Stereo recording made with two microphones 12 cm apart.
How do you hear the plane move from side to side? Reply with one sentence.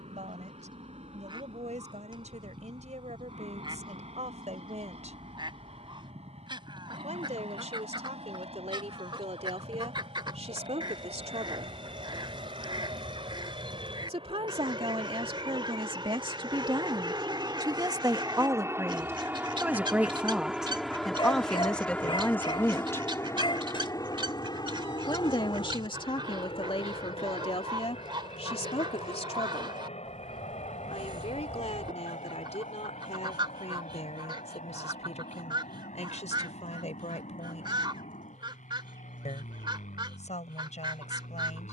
You can hear the plane go from the right side to the left.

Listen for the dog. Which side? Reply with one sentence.
You can hear the dog on the left.